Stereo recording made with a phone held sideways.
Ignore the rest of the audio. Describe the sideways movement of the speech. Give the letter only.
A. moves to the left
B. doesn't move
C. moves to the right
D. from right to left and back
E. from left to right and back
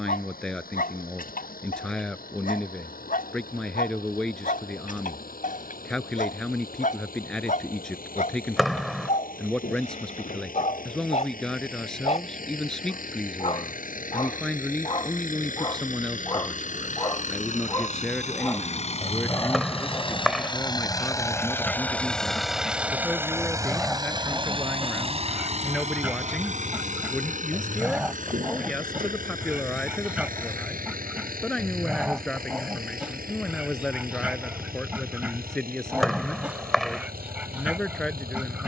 B.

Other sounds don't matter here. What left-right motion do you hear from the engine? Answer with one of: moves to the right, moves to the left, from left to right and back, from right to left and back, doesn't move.
moves to the right.